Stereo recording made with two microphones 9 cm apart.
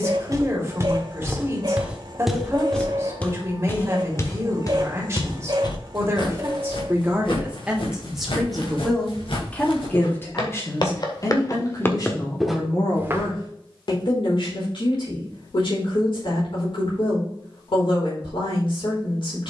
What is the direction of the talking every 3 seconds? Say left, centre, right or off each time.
right, right, centre, left, left, left, left.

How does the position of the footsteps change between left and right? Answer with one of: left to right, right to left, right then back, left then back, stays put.
left then back.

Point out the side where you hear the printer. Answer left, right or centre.
right.